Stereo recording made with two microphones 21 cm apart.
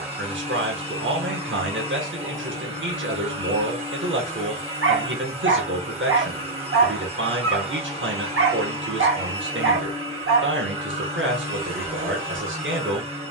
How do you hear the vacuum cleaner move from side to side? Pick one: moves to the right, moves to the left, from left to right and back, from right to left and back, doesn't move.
doesn't move.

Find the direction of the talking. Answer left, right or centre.
right.